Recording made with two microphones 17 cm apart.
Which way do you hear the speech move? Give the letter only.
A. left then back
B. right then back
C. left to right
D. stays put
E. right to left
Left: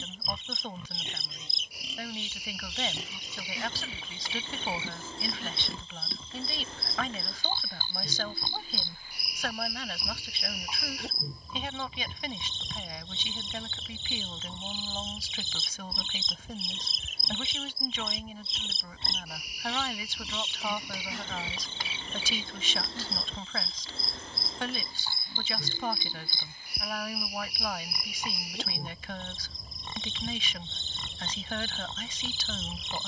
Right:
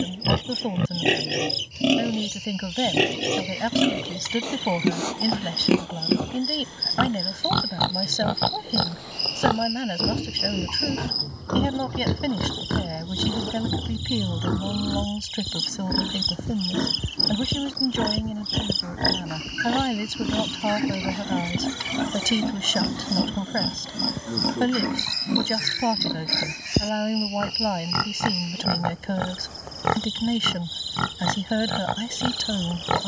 D.